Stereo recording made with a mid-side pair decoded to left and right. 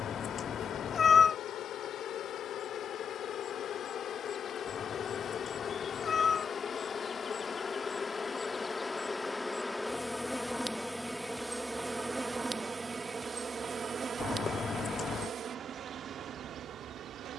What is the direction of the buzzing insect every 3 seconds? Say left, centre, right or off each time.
left, left, left, centre, right, right.